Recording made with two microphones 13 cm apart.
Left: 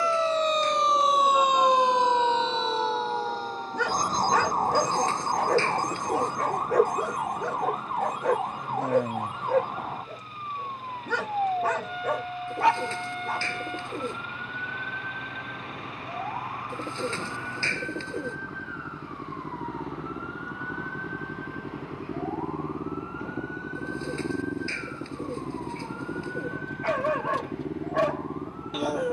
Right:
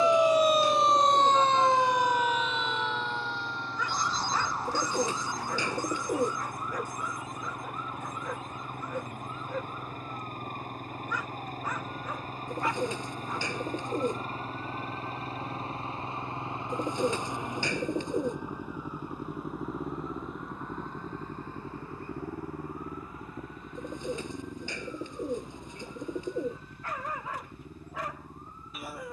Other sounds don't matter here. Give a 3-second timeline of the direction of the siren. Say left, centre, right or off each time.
centre, left, left, left, left, left, left, left, left, left.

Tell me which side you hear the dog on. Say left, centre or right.
left.